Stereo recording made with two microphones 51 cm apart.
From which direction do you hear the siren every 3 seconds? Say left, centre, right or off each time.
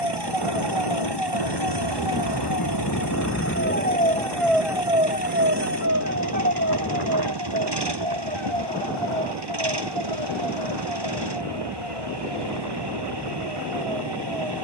left, centre, right, right, right.